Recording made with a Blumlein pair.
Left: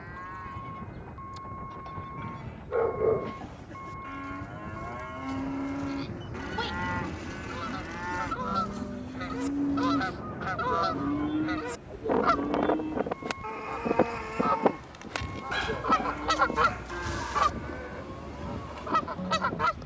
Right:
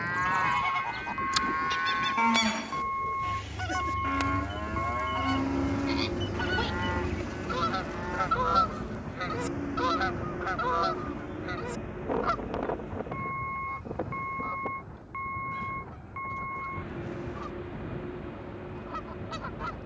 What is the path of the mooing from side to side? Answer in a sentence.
In this clip you hear the mooing travel towards the left.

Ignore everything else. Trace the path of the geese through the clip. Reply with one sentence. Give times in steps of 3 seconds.
You can hear the geese on the right from 0 s, in the centre from 9 s and on the left from 12 s.